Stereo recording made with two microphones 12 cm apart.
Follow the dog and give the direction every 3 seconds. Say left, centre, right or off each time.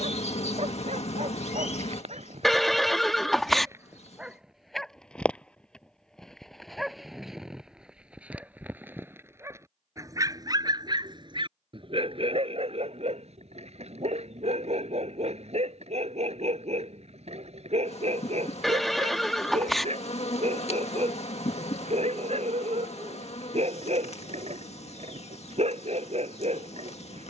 right, centre, centre, right, right, right, right, right, right.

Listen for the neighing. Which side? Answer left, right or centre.
centre.